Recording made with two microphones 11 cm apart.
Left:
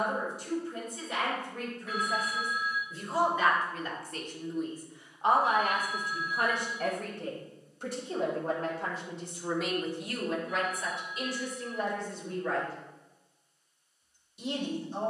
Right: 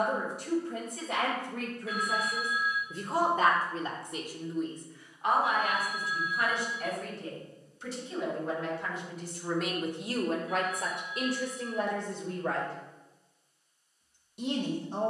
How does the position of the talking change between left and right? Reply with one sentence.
You can hear the talking go left and come back.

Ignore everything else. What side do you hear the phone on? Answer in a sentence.
You can hear the phone on the left.